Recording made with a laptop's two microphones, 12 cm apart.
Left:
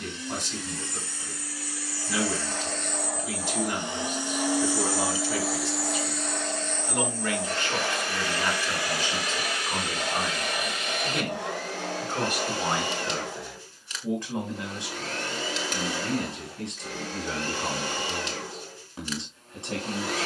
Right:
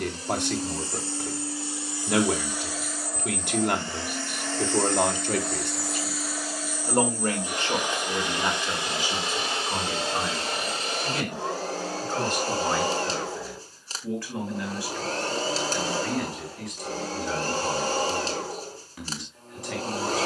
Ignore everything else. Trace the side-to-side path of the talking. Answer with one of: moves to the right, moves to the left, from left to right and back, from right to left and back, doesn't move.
moves to the left.